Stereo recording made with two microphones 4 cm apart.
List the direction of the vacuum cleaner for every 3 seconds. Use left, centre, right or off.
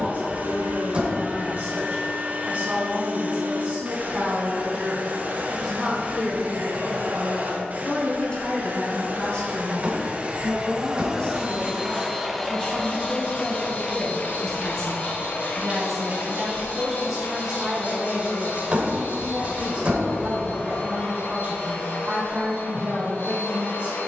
right, right, right, right, left, left, left, left.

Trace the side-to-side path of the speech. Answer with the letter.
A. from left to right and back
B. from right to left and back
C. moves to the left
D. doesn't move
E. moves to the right
B.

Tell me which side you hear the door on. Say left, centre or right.
right.